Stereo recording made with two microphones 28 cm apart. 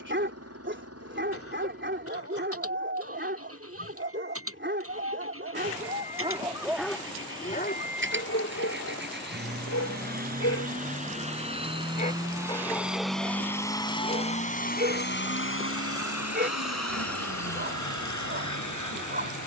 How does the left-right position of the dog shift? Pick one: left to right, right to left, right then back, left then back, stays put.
left then back.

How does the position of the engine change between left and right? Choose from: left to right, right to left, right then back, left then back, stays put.
right to left.